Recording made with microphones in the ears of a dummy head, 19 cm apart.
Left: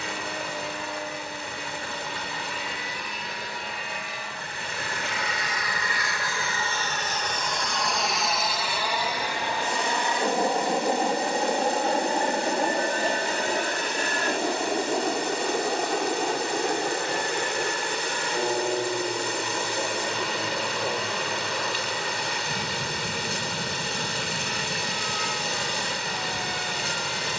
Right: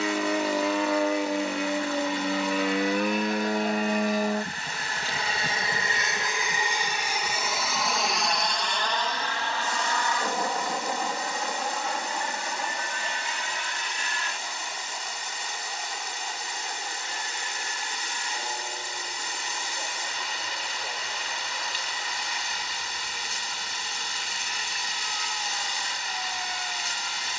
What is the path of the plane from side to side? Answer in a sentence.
You can hear the plane move to the left.